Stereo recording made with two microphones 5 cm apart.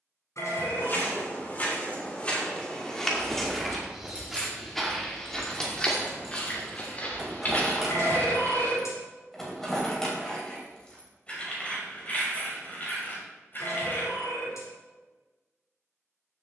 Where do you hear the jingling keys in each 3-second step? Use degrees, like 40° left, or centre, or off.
off, 10° left, 10° right, 20° left, 40° left, off.